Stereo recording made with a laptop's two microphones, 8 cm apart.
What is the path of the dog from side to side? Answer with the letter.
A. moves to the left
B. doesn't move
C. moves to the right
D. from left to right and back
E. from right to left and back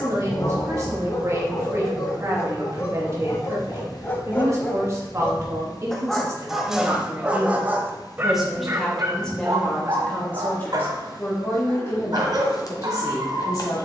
C.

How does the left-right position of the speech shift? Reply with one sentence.
In this clip you hear the speech travel towards the left.